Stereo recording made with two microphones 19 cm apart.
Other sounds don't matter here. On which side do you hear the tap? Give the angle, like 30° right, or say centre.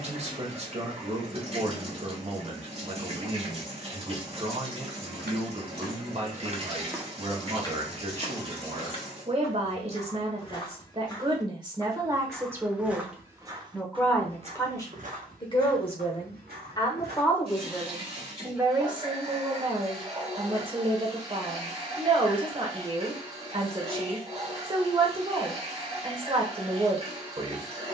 30° right.